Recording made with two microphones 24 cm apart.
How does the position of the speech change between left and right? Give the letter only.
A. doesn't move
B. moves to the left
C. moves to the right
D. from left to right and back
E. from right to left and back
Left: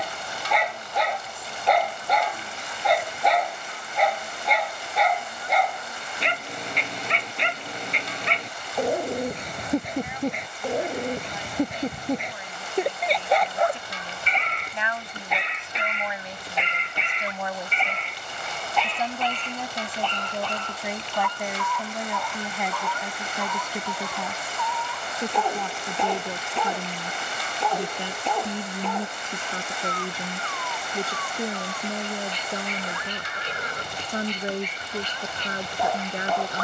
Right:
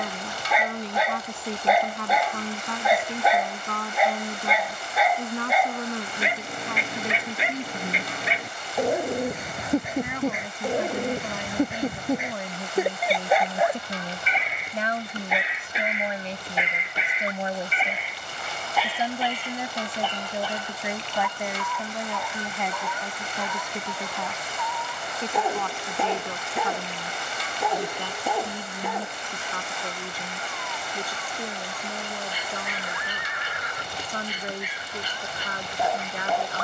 B.